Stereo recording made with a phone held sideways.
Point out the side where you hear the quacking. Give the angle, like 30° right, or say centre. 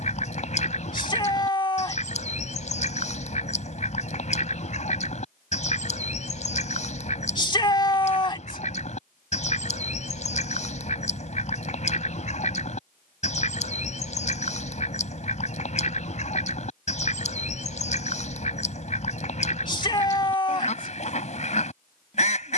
50° left.